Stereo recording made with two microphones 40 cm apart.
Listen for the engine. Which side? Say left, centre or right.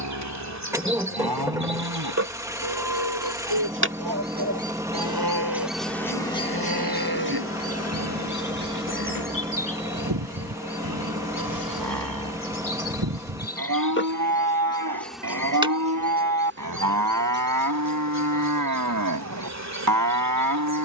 centre.